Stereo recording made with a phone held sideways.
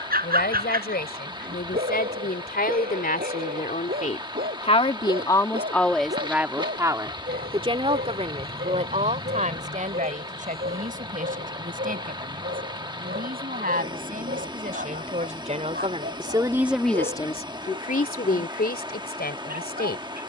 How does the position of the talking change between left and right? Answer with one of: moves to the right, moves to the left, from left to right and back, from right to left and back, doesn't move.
from left to right and back.